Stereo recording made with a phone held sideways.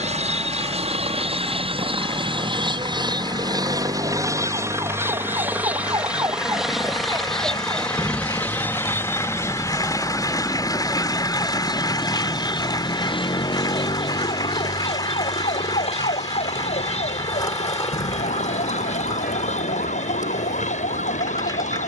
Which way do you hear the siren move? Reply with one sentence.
You can hear the siren move from right to left.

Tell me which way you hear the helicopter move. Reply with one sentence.
You can hear the helicopter go from the right side to the left.